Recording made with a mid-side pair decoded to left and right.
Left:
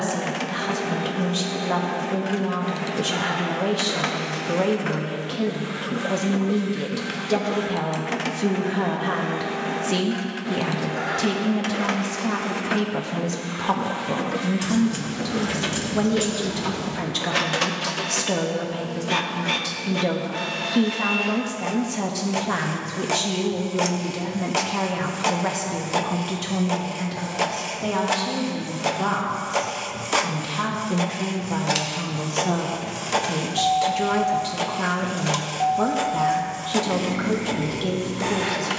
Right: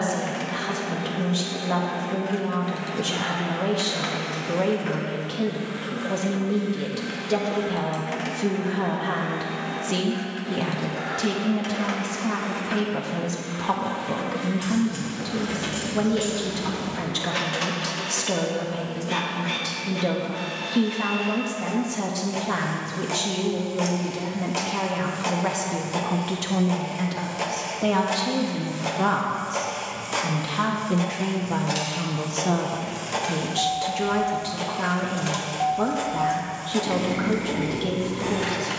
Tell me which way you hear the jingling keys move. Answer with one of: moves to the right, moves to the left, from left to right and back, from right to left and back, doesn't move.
moves to the right.